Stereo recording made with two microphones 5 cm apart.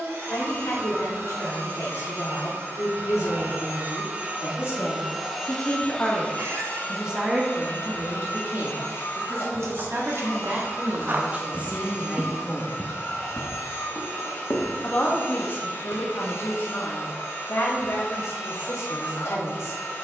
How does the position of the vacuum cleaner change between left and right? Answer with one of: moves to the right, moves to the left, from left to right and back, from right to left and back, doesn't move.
moves to the left.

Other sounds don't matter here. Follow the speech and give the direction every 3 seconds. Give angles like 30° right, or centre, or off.
80° left, 60° left, 20° right, 40° right, centre, 60° left, 70° left.